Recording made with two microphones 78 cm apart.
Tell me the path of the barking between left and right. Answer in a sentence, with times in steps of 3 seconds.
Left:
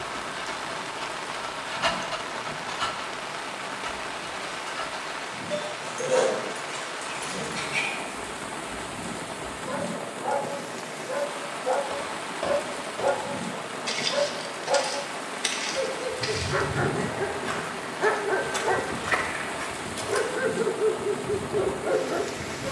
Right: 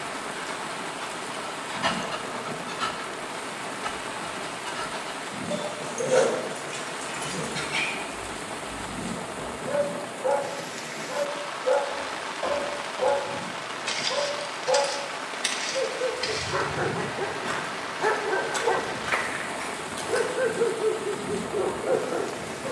In this clip you hear the barking on the left from 0 s, in the centre from 3 s, on the right from 6 s, in the centre from 9 s and on the left from 12 s.